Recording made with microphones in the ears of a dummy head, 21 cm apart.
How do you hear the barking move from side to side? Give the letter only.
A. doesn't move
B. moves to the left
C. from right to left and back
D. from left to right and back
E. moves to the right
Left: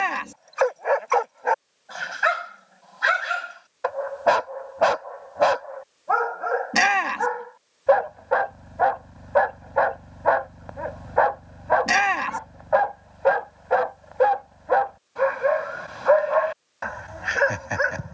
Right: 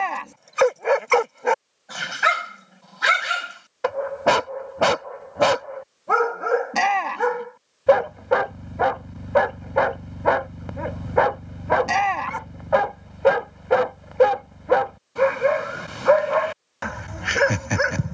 A.